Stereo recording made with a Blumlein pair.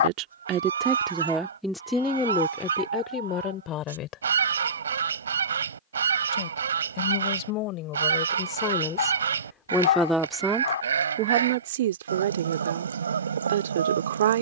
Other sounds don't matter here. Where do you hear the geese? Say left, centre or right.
right.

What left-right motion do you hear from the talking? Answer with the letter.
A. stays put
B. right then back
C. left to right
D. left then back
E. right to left
D.